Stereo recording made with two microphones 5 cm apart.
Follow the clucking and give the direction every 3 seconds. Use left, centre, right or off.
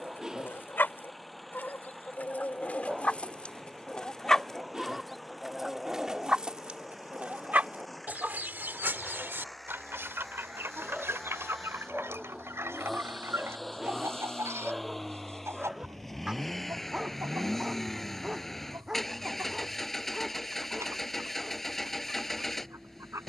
left, centre, right, right, right, right, right, right.